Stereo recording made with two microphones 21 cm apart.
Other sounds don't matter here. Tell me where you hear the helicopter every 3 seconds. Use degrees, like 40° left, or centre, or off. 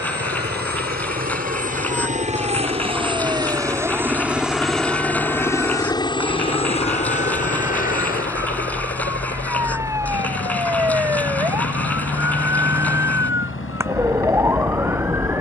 40° right, centre, 30° left, 50° left, 60° left.